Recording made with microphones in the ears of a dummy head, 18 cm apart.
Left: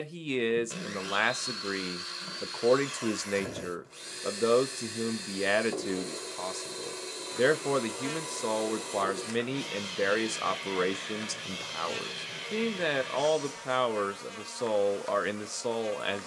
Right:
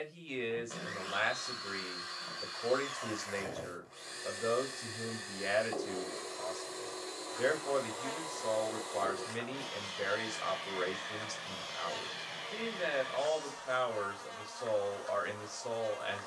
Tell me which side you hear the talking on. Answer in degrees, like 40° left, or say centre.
70° left.